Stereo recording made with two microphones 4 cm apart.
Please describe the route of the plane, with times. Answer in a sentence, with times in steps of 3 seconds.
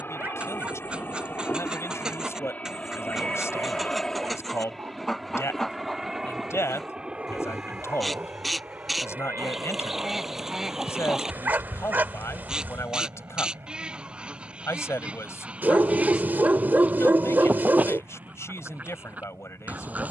In this clip you hear the plane on the left from 0 s, in the centre from 3 s and on the right from 6 s.